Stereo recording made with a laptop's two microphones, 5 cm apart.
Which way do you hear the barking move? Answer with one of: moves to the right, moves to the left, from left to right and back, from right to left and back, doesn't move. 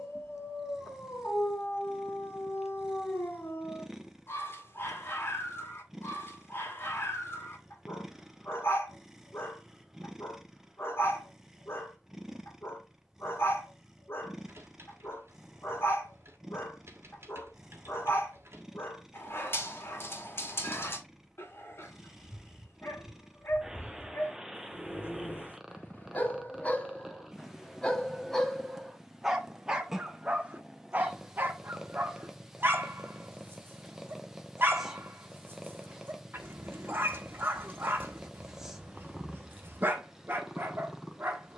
moves to the right.